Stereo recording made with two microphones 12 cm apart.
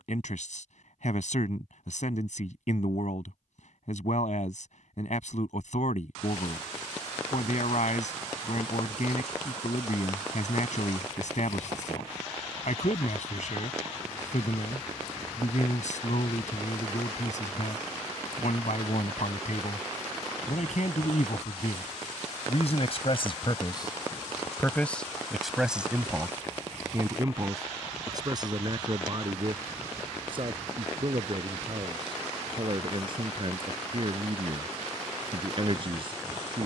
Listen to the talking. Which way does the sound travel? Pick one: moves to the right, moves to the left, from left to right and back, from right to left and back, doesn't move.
moves to the right.